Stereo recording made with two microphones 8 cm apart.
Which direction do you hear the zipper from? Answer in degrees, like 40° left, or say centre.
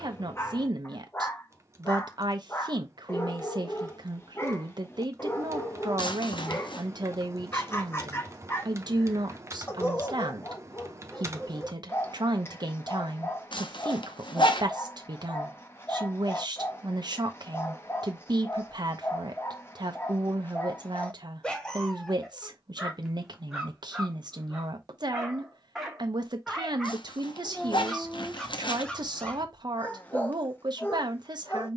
70° left.